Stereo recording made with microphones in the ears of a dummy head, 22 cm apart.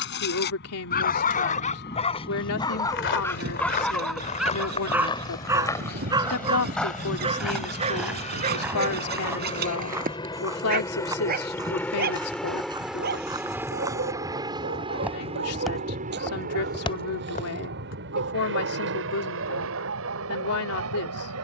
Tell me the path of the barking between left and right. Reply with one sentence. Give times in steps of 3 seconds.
In this clip you hear the barking on the left from 0 s, in the centre from 3 s and on the right from 6 s.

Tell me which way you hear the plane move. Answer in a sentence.
You can hear the plane move from left to right.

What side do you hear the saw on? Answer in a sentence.
You can hear the saw on the right.